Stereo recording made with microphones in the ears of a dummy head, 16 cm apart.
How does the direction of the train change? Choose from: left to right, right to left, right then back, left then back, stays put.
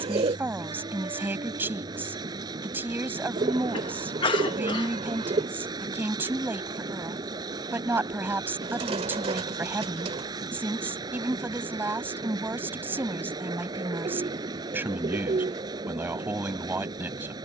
stays put.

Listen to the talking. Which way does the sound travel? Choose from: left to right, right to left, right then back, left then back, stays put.
stays put.